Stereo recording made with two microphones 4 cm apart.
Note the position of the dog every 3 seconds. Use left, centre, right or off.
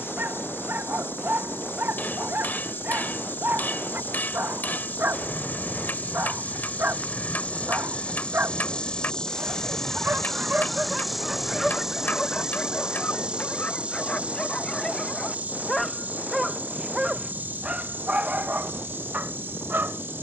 right, right, right, right, left, centre, right.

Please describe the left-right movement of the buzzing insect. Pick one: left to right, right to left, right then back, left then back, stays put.
left to right.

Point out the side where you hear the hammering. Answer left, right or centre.
left.